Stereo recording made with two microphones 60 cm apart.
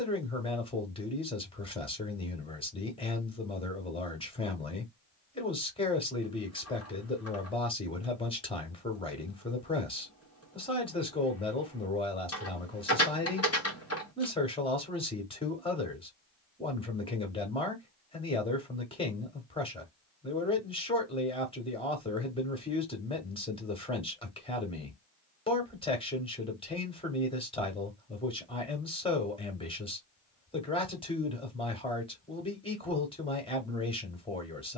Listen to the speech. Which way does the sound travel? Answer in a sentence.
You can hear the speech stay in one place.